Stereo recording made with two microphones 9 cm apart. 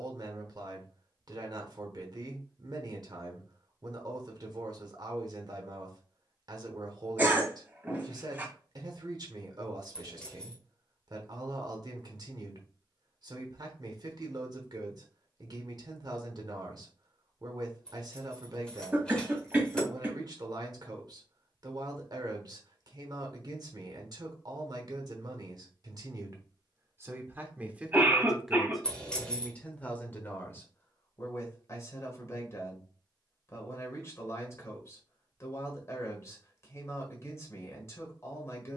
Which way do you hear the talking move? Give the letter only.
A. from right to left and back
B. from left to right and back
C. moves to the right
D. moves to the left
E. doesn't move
D.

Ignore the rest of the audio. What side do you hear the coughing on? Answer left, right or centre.
right.